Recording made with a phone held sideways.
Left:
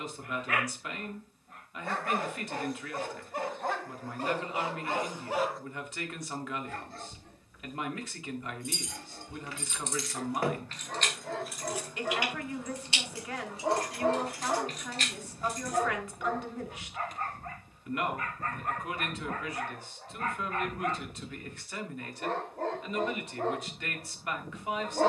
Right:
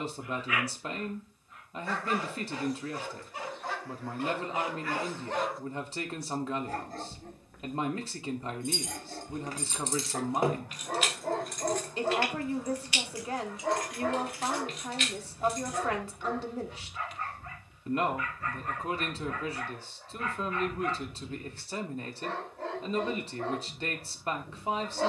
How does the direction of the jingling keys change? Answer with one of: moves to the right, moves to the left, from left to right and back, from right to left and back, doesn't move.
moves to the left.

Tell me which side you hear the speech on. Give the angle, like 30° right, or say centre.
30° right.